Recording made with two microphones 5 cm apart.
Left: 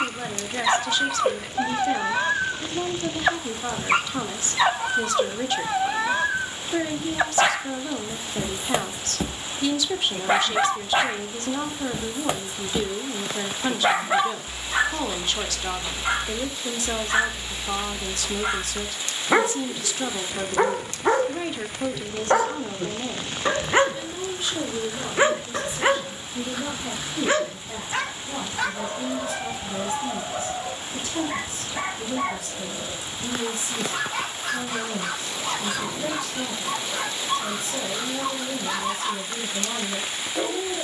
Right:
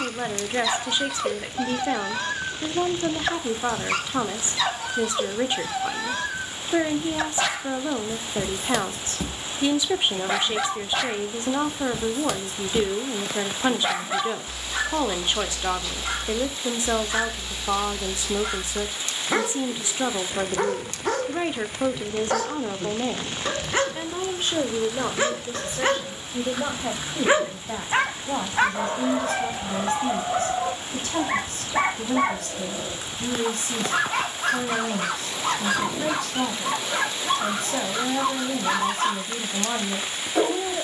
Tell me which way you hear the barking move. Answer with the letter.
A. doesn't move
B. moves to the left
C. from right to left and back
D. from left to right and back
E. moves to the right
E.